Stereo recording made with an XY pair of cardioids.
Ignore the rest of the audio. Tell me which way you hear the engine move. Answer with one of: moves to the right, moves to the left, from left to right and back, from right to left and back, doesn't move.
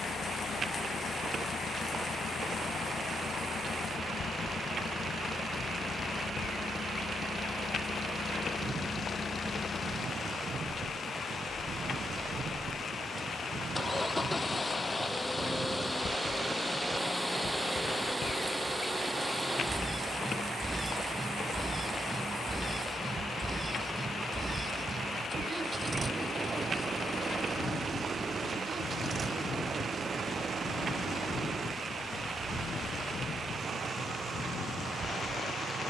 moves to the right.